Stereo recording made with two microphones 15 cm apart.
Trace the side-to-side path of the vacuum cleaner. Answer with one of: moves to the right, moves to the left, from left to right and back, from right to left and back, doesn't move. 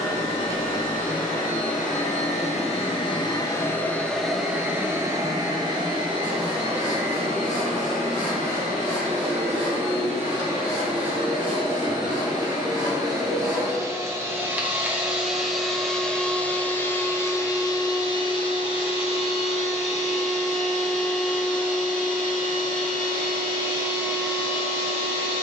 from left to right and back.